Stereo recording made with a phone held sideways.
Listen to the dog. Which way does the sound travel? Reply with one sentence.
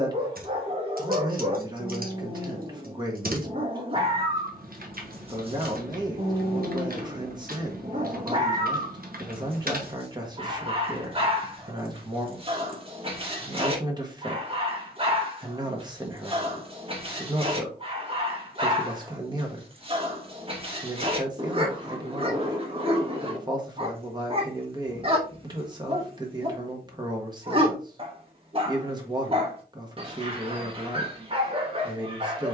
In this clip you hear the dog stay put.